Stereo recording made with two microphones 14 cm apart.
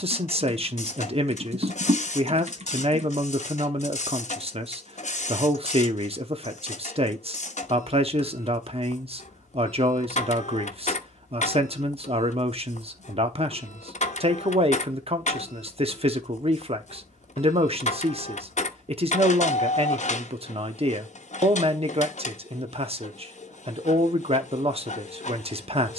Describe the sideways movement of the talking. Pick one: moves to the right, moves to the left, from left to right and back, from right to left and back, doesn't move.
doesn't move.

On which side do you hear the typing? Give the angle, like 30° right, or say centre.
50° right.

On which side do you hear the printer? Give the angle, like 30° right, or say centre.
60° left.